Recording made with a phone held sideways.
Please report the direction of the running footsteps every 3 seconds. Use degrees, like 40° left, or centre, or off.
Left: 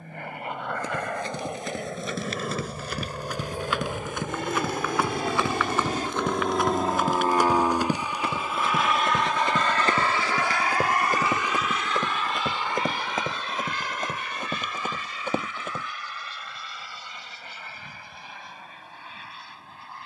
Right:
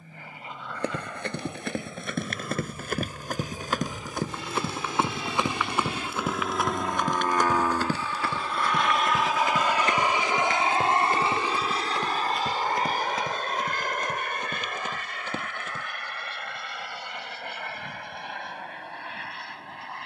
60° right, 30° right, 10° left, 30° left, 50° left, 50° left, off.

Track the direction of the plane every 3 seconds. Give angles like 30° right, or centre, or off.
70° left, 60° left, 20° left, 20° right, 40° right, 50° right, 60° right.